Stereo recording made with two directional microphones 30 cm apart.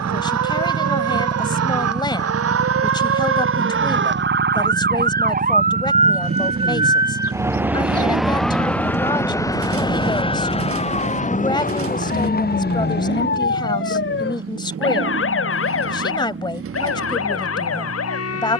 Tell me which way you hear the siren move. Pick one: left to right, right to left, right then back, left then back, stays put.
right to left.